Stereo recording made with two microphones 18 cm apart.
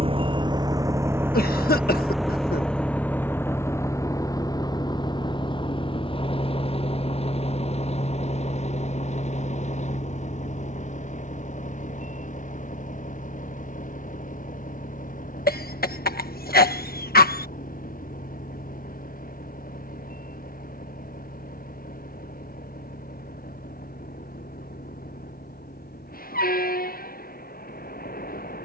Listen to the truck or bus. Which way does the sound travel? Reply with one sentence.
In this clip you hear the truck or bus move to the left.